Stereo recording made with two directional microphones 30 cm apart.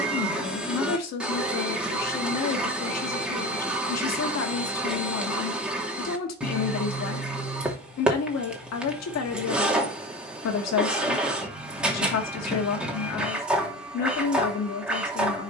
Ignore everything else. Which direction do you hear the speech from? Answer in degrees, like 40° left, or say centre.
60° left.